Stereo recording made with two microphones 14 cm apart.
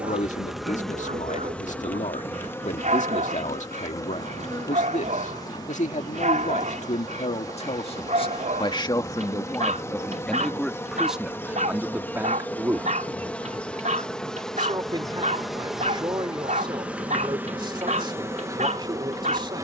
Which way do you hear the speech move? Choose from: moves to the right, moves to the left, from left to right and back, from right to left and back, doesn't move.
moves to the right.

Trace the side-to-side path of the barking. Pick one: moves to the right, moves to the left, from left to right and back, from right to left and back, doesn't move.
doesn't move.